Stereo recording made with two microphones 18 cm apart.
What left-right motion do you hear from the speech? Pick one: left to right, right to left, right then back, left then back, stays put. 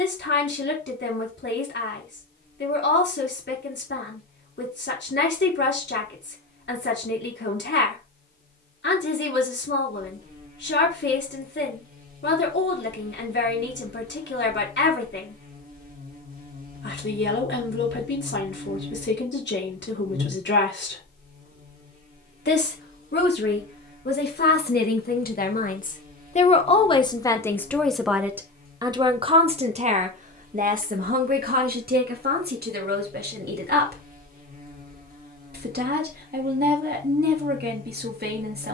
left to right.